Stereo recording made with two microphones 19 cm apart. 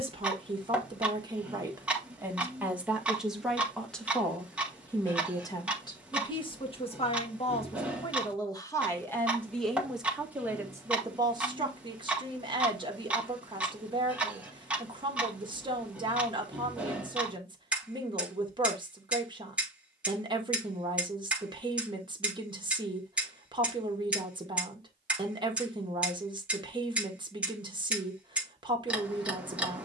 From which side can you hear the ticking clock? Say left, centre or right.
centre.